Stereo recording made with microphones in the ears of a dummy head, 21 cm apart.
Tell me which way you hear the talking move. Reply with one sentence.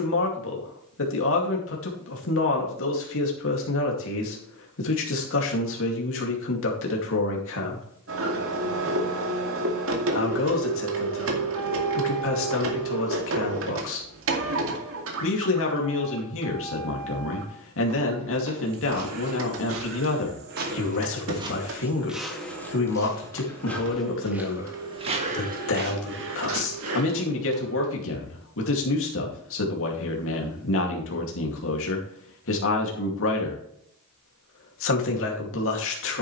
In this clip you hear the talking stay put.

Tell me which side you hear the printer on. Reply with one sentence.
In this clip you hear the printer on the right.